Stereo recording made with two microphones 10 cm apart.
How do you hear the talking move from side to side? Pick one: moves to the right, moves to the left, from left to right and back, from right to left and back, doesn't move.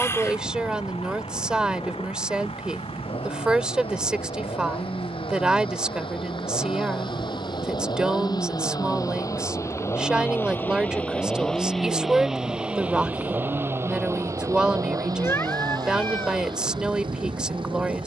doesn't move.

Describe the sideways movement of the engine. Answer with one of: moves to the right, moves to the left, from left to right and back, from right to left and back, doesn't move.
moves to the right.